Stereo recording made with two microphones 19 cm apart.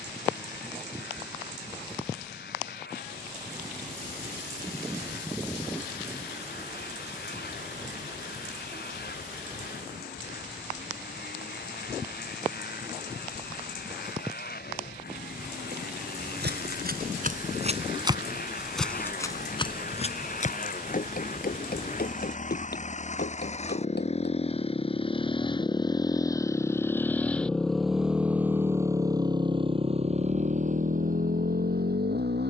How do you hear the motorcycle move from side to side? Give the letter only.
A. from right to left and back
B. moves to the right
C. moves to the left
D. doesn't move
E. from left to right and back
B.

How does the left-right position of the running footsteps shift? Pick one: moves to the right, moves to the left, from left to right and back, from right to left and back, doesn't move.
moves to the left.